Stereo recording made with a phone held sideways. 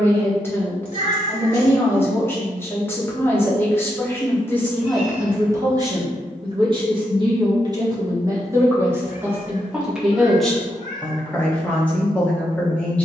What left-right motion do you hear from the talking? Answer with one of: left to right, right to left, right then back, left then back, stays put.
right then back.